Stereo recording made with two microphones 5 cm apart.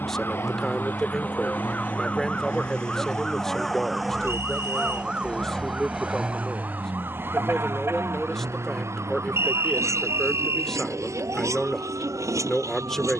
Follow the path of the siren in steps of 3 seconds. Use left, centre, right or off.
left, centre, right, right, right.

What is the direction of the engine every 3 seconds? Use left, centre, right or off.
left, left, right, right, right.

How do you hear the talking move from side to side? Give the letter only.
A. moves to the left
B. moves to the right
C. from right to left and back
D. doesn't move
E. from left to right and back
D.